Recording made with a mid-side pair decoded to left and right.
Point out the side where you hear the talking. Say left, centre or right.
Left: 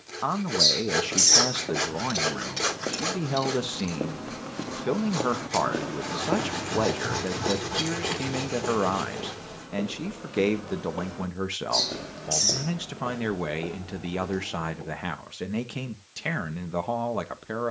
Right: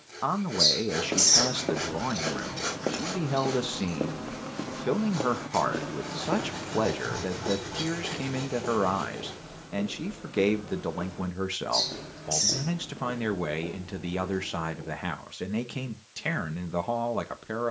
centre.